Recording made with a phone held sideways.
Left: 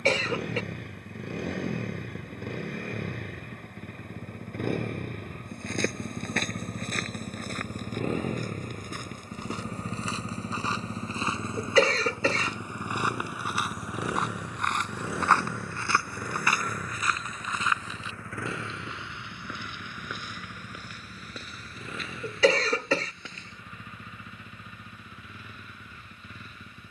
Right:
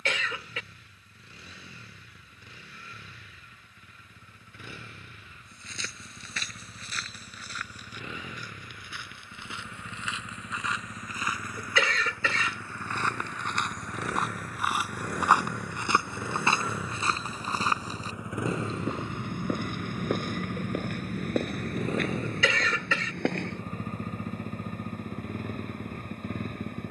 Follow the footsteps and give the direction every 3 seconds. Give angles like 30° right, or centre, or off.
off, 60° left, 50° left, 30° left, 10° left, 20° right, 50° right, 60° right, off.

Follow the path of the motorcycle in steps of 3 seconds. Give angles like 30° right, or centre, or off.
60° left, 60° left, 50° left, 30° left, 20° left, 10° right, 20° right, 40° right, 50° right.